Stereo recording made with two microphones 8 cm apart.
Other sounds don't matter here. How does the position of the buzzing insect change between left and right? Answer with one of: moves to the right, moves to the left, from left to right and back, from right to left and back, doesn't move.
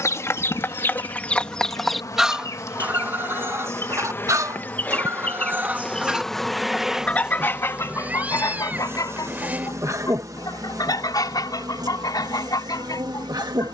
moves to the right.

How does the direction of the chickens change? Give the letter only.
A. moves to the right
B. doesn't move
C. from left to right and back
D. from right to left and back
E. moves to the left
C.